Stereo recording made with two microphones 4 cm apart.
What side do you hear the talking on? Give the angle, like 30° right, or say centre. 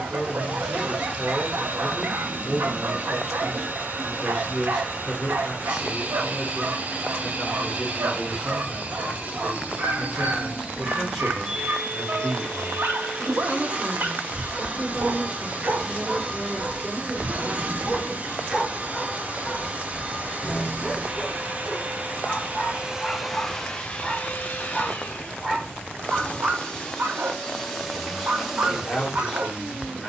centre.